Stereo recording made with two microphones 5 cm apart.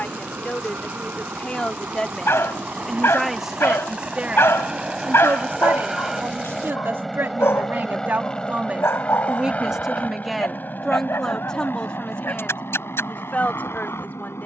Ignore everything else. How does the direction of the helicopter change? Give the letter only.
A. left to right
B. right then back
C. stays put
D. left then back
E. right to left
E.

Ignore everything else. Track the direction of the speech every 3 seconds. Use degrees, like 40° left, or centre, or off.
30° left, 30° right, 50° right, centre, 30° left.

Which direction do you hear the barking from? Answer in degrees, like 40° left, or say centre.
70° left.